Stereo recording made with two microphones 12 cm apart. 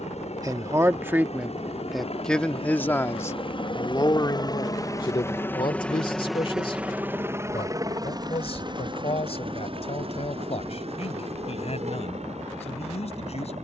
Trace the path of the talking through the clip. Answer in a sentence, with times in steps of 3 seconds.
You can hear the talking in the centre from 0 s and on the left from 3 s.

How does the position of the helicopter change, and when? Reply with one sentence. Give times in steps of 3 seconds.
In this clip you hear the helicopter on the left from 0 s and on the right from 6 s.